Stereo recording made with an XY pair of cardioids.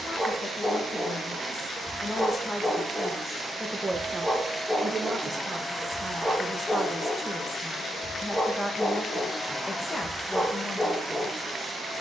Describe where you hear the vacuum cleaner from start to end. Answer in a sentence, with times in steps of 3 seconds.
You can hear the vacuum cleaner on the right from 0 s, in the centre from 3 s, on the left from 6 s and in the centre from 9 s.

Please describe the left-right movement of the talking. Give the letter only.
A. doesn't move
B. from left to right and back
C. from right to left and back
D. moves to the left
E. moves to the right
B.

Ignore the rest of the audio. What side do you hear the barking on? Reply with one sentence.
You can hear the barking in the centre.